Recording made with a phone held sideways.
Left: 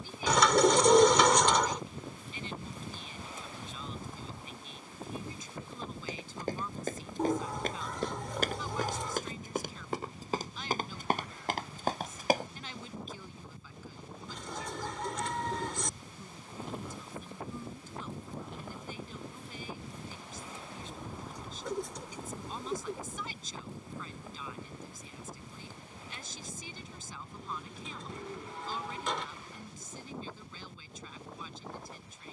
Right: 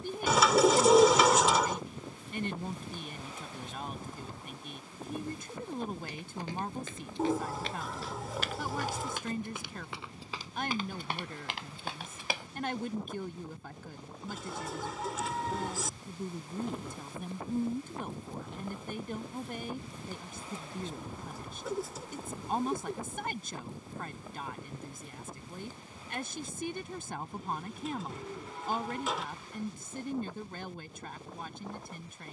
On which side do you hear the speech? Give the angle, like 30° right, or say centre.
60° right.